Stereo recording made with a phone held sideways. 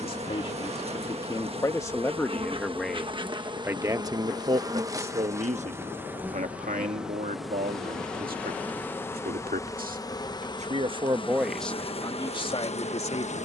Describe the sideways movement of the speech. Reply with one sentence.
In this clip you hear the speech go right and come back.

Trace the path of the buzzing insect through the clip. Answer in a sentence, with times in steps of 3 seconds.
In this clip you hear the buzzing insect on the right from 0 s, in the centre from 6 s and on the left from 9 s.